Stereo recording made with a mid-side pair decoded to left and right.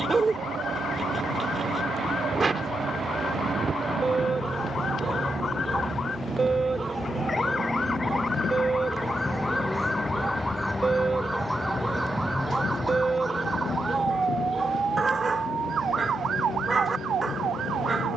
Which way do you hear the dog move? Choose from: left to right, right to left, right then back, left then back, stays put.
stays put.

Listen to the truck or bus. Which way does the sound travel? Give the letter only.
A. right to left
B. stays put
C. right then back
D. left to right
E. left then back
A.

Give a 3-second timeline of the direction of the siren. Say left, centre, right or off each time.
left, left, left, centre, right, right.